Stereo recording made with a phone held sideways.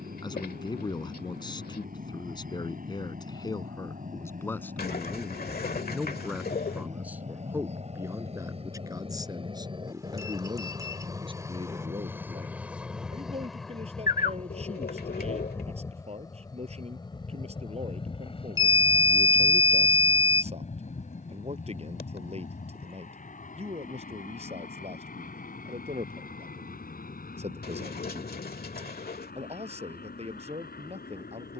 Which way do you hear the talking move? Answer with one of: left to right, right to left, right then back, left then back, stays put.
left to right.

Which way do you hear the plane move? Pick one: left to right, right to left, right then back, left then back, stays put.
right to left.